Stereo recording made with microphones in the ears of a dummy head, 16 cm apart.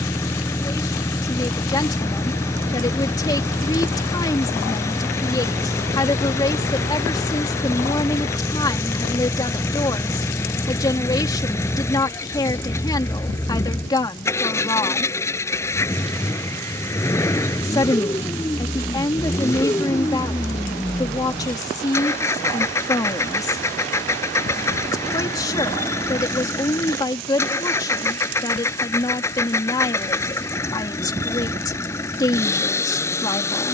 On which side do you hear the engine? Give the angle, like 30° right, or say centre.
10° left.